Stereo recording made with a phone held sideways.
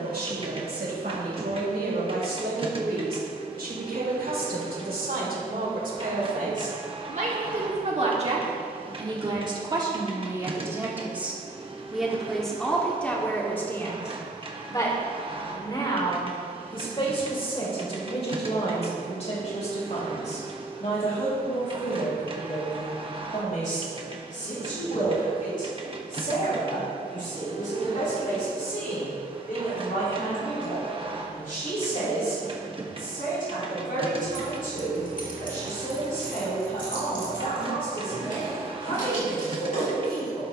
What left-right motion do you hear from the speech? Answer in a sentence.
You can hear the speech go from the right side to the left.